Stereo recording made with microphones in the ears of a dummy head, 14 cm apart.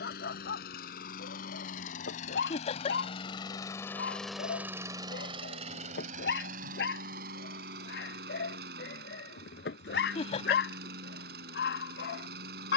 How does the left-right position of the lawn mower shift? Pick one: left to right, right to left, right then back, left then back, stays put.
left to right.